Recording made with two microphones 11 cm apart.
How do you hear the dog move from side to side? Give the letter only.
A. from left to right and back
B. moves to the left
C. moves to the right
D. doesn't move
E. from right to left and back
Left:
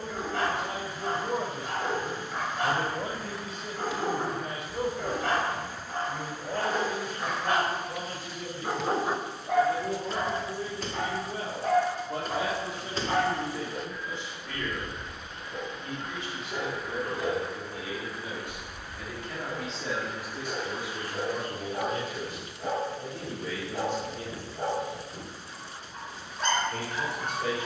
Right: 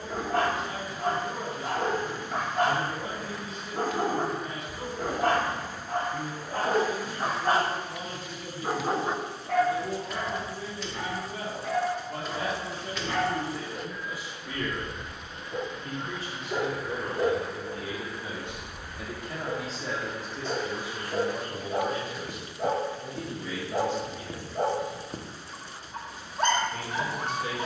E.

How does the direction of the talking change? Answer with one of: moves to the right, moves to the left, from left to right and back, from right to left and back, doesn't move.
from left to right and back.